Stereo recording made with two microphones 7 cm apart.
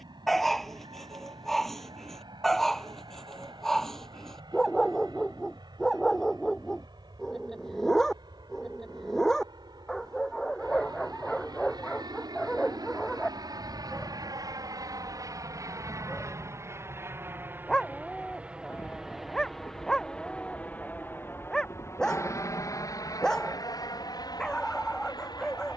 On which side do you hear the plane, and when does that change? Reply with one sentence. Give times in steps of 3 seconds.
You can hear the plane on the right from 0 s, in the centre from 18 s and on the left from 21 s.